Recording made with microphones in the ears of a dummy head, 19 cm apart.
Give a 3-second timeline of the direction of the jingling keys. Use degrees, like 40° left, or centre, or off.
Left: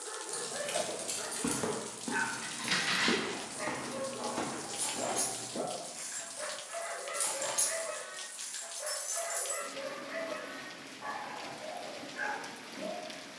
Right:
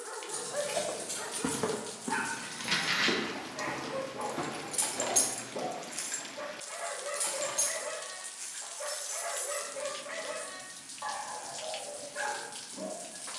30° left, 40° right, 10° left, 40° left, off.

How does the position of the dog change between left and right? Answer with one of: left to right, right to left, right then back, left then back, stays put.
stays put.